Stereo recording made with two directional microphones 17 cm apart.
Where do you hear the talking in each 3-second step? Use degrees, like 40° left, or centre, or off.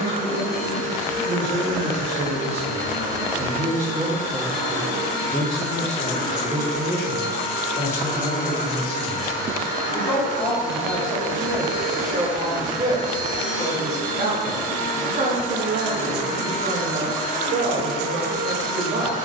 60° right, 10° right, 20° left, 10° left, 30° right, 50° right, 50° right.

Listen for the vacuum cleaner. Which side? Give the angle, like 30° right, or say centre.
60° right.